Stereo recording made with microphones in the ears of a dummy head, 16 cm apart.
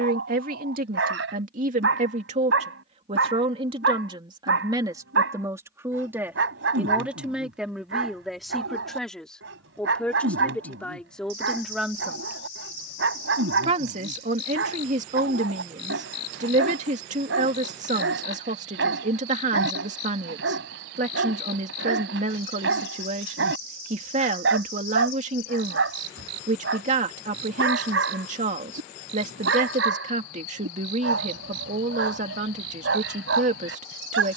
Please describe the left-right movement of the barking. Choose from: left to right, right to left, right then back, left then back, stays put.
stays put.